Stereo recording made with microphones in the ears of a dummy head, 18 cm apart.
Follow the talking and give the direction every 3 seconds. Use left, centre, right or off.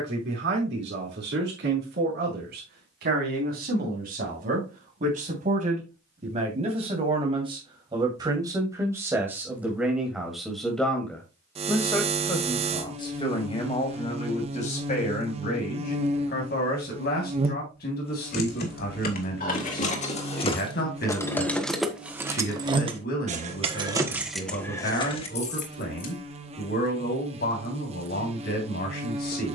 right, right, right, centre, left, left, left, left, left, left.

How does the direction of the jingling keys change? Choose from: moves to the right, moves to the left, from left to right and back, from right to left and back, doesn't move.
from left to right and back.